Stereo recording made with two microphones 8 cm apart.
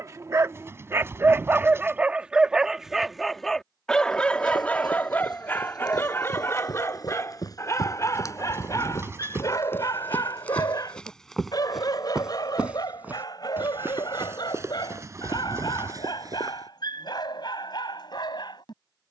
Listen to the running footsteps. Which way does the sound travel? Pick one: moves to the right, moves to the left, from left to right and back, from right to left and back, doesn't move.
moves to the right.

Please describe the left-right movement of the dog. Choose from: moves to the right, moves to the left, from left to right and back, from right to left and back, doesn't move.
moves to the left.